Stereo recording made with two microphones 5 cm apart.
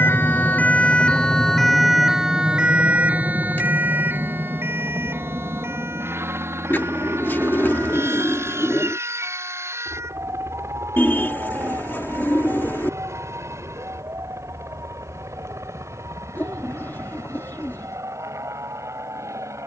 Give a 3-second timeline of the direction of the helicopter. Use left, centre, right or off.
centre, right, right, right, right, right, right.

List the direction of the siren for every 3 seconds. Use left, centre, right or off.
centre, right, right, right, right, right, right.